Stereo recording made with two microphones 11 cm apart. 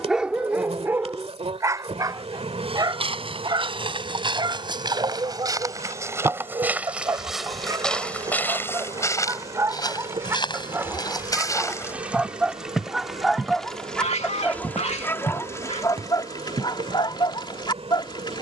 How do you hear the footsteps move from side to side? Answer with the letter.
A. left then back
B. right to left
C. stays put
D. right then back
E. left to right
A.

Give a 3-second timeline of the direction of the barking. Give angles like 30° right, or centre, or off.
20° right, 40° right, 30° right, 20° right, centre, 40° left.